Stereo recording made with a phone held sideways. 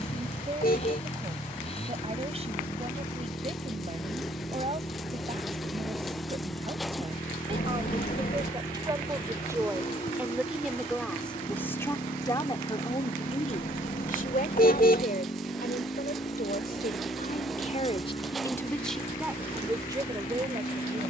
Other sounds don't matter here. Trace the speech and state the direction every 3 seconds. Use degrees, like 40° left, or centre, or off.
40° right, 40° right, 30° right, centre, 40° left, 60° left, 10° right.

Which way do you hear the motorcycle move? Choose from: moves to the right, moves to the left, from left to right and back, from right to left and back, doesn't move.
doesn't move.